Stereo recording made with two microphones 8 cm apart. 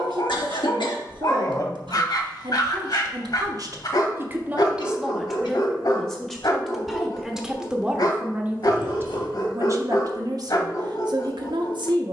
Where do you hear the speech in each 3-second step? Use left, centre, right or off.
right, right, centre, right.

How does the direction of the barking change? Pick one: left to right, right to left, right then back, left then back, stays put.
stays put.